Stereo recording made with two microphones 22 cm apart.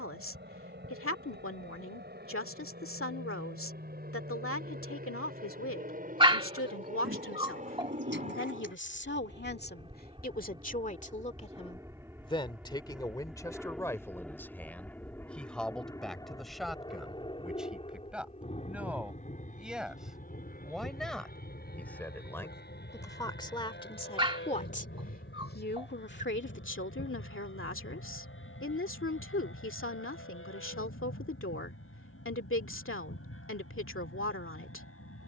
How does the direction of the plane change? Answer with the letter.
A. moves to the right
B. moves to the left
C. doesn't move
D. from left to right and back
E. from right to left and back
B.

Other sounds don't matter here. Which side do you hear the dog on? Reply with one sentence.
You can hear the dog on the right.